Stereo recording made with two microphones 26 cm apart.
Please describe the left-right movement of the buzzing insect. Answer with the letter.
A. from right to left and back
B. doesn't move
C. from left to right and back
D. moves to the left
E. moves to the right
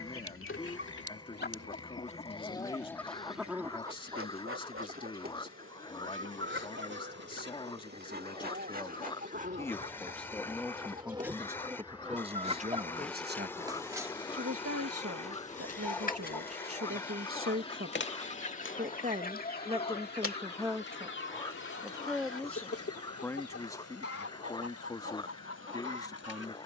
D.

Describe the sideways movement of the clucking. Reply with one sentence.
You can hear the clucking go right and come back.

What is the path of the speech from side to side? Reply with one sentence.
You can hear the speech go right and come back.